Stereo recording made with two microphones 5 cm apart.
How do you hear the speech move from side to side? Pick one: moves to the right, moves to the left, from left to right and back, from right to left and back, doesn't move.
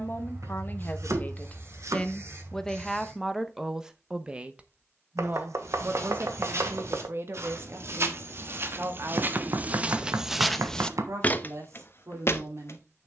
moves to the right.